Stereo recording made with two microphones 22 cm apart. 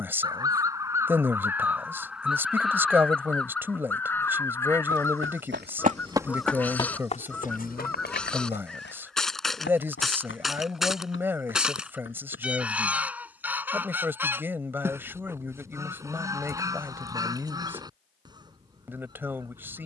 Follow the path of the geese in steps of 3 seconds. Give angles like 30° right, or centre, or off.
10° right, 10° left, 10° left, centre, 10° right, 10° right, 20° right.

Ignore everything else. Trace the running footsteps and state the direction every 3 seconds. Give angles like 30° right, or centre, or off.
off, 60° right, 30° left, 60° left, 60° left, off, off.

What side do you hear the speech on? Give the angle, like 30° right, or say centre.
10° right.